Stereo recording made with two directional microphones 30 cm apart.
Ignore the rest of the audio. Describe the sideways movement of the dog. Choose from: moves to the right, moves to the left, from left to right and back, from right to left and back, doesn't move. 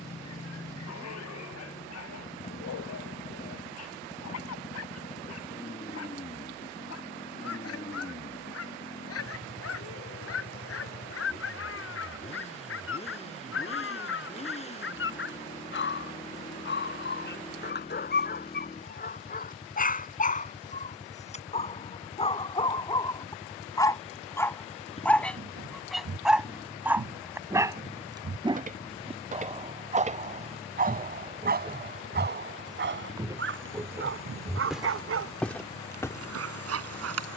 moves to the right.